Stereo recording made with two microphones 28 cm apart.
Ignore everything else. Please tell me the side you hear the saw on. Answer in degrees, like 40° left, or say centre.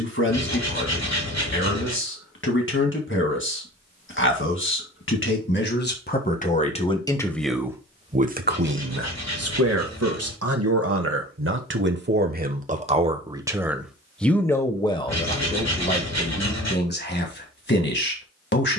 80° left.